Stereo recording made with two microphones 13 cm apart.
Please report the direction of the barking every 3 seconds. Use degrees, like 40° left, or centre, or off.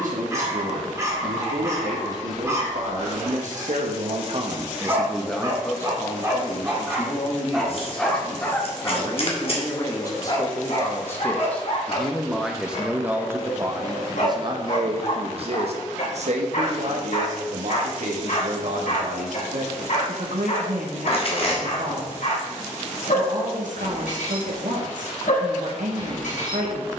20° right, 20° right, centre, 50° left, 70° left, 70° left, 70° left, 70° left, 70° left.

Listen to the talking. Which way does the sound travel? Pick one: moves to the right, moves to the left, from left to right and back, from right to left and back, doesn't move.
from right to left and back.